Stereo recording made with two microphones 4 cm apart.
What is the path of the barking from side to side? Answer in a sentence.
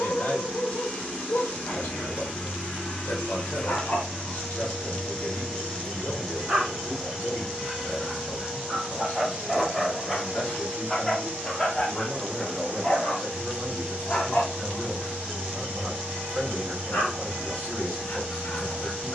In this clip you hear the barking go right and come back.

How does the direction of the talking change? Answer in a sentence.
In this clip you hear the talking move to the right.